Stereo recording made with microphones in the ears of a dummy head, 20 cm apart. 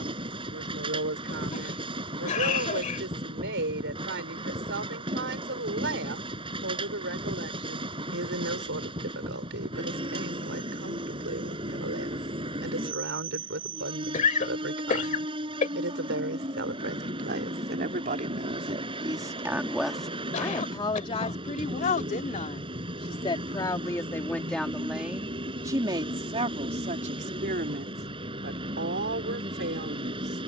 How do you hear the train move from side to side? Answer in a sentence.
In this clip you hear the train stay in one place.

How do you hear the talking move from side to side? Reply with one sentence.
In this clip you hear the talking go left and come back.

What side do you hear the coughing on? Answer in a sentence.
You can hear the coughing on the left.